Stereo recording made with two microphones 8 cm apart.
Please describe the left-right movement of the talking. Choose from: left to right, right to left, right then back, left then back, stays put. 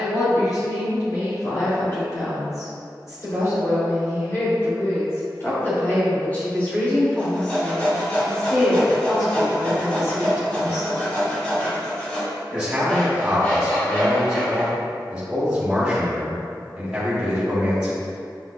left to right.